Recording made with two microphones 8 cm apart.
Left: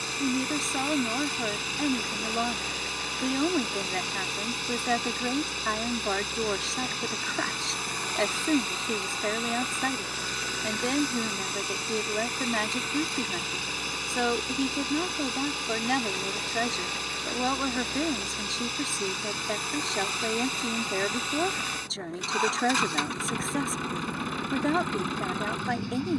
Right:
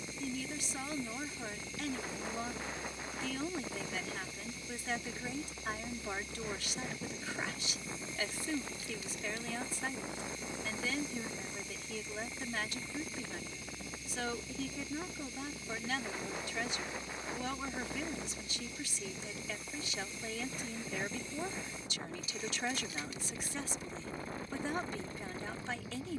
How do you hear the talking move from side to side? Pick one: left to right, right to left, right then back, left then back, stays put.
stays put.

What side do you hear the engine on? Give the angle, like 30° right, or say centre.
70° left.